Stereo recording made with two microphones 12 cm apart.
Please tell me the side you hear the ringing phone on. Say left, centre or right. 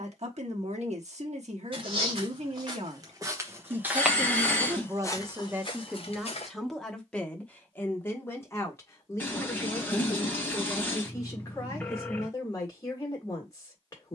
centre.